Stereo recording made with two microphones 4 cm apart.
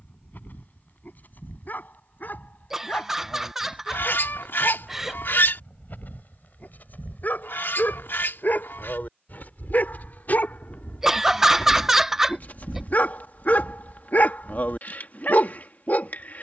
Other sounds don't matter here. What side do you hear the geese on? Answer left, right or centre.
left.